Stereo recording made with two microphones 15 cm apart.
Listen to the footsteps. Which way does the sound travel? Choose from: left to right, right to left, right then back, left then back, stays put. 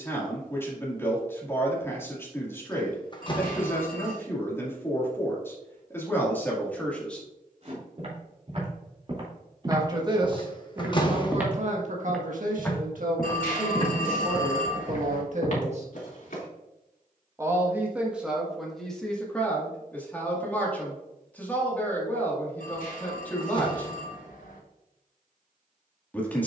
right to left.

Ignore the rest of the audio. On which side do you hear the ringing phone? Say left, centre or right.
left.